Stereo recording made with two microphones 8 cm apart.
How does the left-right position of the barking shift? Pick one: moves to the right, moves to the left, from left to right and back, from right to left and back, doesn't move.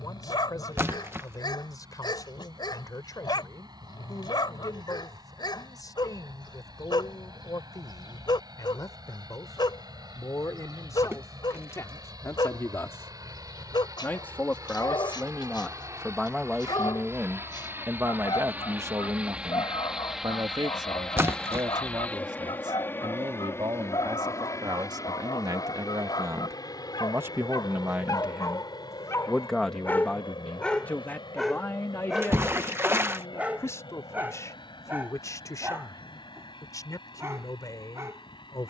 moves to the right.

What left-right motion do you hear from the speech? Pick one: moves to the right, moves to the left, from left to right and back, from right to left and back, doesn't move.
from left to right and back.